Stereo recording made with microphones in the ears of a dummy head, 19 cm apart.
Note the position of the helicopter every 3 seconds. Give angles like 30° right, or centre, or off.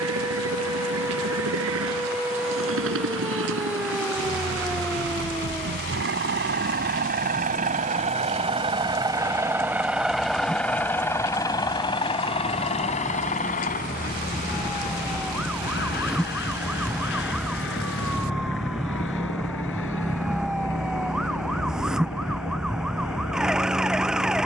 80° right, 70° right, 40° right, centre, 30° left, 50° left, 60° left, 60° left.